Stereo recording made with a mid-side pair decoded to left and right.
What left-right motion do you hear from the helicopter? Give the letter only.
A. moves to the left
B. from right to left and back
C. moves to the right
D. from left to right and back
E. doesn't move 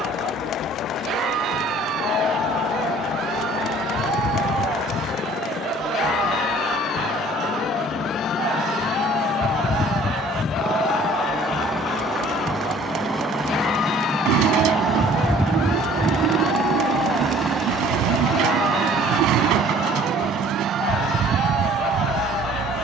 C.